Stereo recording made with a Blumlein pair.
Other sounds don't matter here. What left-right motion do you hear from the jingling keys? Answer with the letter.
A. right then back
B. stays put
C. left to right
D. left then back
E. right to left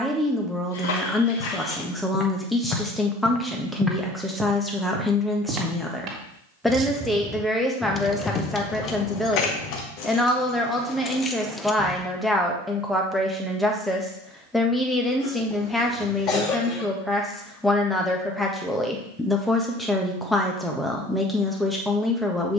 D.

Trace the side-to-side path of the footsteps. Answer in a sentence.
In this clip you hear the footsteps travel towards the right.